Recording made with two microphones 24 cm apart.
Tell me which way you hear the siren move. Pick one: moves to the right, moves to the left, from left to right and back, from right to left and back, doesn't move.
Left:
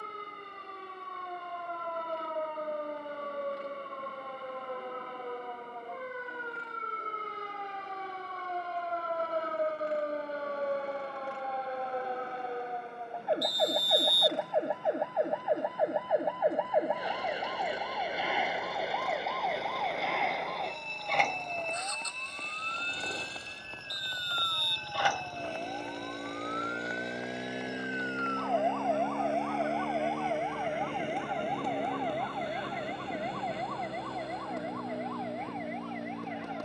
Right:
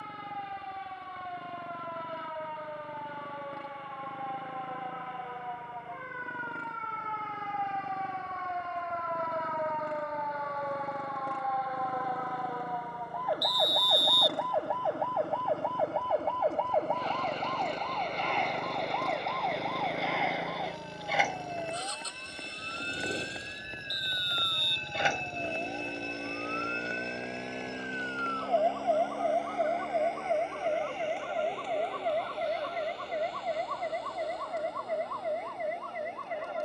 moves to the right.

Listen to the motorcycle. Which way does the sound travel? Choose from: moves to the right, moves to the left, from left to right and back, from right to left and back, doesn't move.
moves to the left.